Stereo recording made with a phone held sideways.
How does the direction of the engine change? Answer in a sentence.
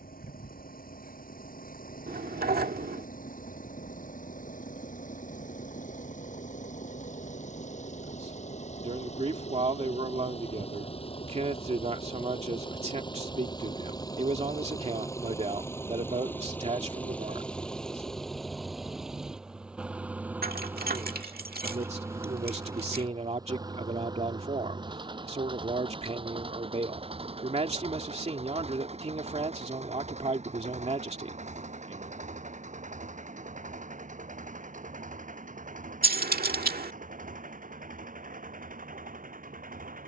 You can hear the engine move from left to right.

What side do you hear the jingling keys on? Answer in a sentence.
You can hear the jingling keys on the right.